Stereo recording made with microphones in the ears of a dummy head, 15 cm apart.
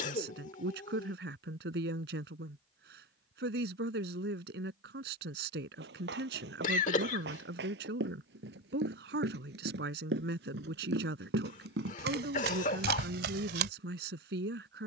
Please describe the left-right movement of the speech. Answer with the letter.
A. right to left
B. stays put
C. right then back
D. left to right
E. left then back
B.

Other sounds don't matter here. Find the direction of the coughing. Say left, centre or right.
left.